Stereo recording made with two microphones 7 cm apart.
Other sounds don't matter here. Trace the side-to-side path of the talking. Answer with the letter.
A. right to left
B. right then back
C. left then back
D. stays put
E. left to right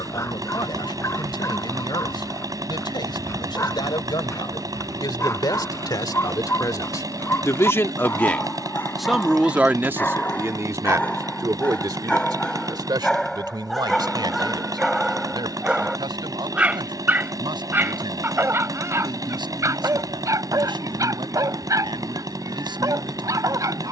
E.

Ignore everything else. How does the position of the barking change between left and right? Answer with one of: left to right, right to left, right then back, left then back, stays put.
left to right.